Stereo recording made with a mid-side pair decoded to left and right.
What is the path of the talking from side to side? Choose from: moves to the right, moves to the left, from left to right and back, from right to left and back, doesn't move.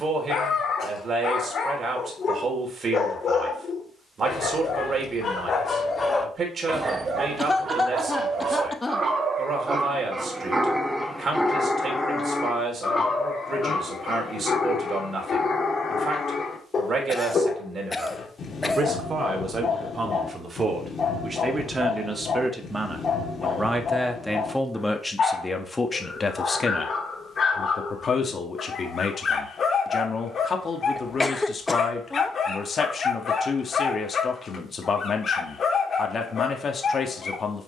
moves to the left.